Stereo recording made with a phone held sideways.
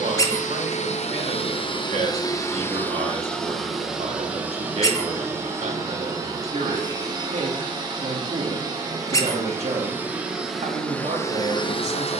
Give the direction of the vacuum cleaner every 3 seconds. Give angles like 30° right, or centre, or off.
40° left, 10° right, 30° right, centre.